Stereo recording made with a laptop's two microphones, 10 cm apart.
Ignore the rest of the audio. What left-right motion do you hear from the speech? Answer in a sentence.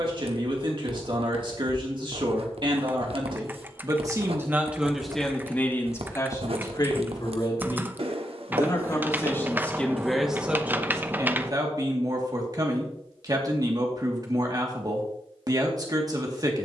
You can hear the speech move from right to left and back again.